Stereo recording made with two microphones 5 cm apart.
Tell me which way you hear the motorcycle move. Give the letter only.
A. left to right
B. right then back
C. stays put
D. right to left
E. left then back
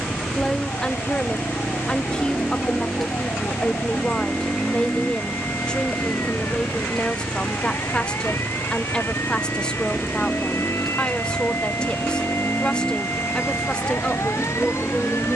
C.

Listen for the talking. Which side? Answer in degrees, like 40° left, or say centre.
20° left.